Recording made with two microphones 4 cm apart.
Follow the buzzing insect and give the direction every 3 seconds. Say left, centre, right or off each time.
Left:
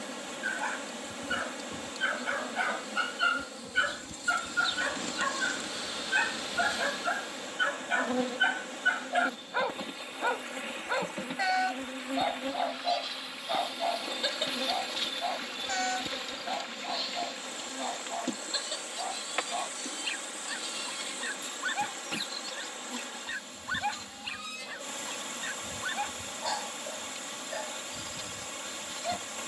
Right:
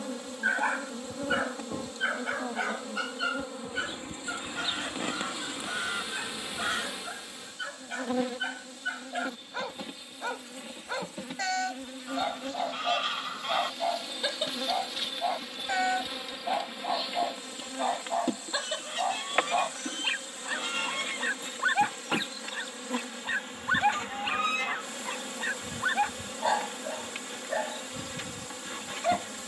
right, right, centre, centre, centre, centre, right, right, right, right.